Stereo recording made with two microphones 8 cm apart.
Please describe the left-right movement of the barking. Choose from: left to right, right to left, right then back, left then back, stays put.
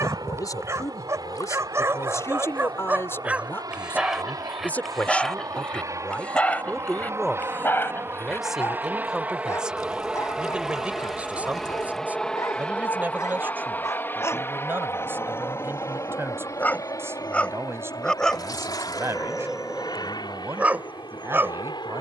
left then back.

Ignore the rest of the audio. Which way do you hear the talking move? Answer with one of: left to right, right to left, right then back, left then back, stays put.
left to right.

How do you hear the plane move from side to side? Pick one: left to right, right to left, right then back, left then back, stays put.
right to left.